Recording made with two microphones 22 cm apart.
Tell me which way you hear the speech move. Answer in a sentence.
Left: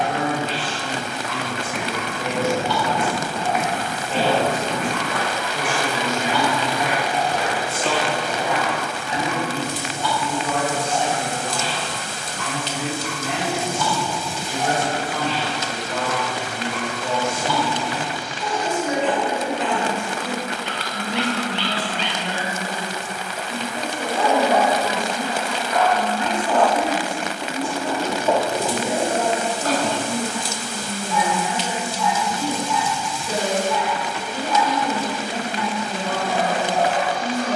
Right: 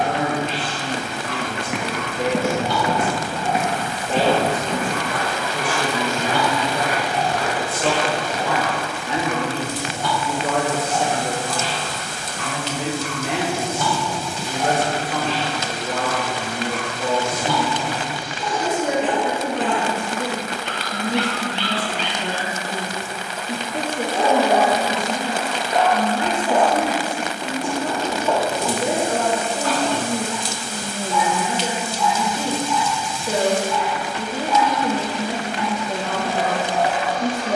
In this clip you hear the speech stay in one place.